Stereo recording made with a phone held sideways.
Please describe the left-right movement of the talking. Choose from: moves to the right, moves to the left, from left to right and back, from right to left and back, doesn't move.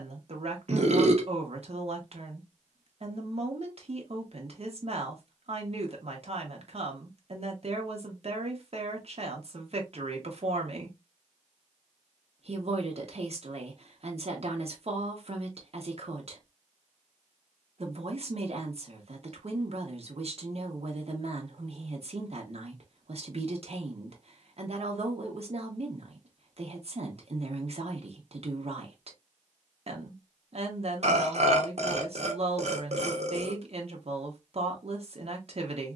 doesn't move.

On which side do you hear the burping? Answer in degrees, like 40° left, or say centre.
50° right.